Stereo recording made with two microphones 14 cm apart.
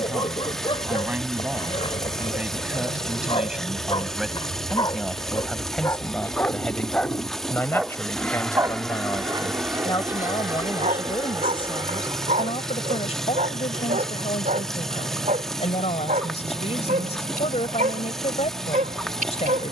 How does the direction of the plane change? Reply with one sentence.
In this clip you hear the plane travel towards the right.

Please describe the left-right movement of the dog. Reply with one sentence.
In this clip you hear the dog move from left to right.